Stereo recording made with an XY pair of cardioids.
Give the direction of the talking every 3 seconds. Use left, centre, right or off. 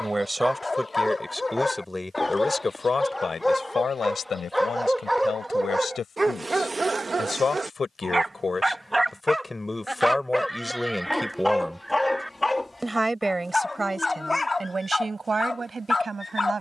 centre, left, left, centre, right, right.